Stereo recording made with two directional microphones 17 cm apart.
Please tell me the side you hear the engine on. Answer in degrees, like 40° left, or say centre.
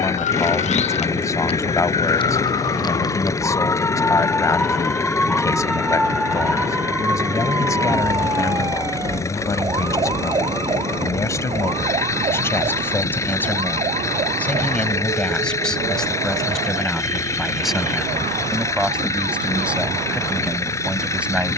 20° left.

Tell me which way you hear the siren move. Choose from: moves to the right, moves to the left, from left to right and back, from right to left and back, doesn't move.
moves to the right.